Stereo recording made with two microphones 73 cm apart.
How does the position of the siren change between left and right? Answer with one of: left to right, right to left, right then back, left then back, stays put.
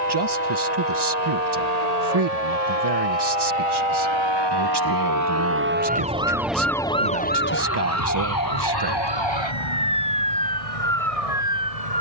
right to left.